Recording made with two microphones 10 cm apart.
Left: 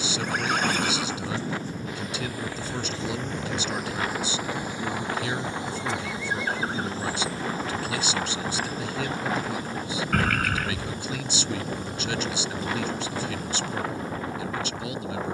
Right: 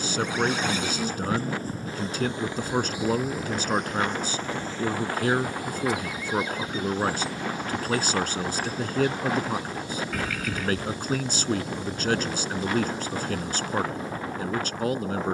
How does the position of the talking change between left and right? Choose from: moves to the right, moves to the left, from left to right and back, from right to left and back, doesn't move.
doesn't move.